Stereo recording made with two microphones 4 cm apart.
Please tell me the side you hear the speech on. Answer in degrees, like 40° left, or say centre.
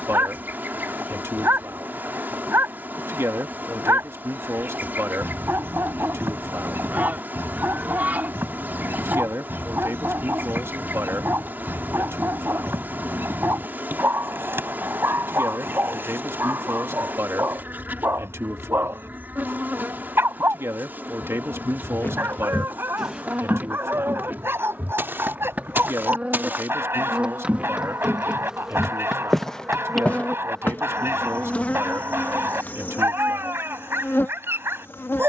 80° right.